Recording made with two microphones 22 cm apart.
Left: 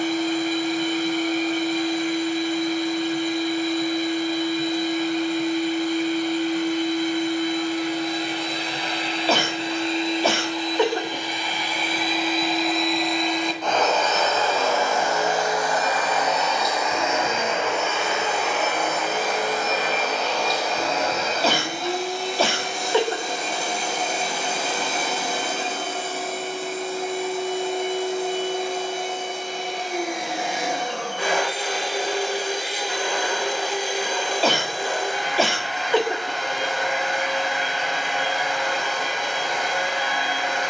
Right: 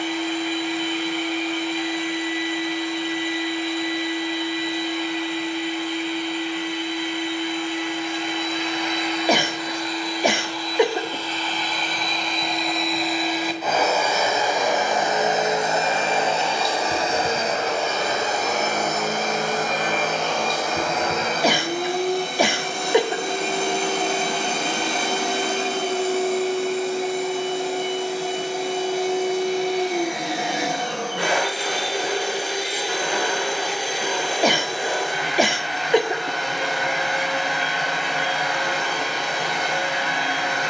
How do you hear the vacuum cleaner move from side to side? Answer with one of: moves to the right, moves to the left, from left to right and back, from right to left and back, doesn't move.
moves to the right.